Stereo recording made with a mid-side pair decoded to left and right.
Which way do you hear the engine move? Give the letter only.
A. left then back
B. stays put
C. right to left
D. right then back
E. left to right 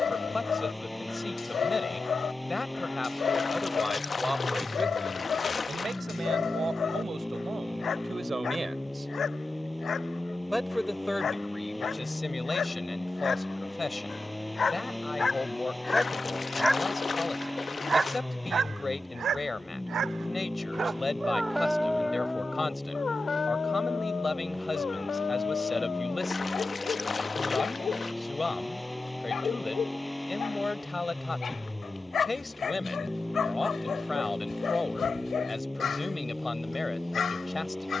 B.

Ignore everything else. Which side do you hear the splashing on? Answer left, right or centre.
left.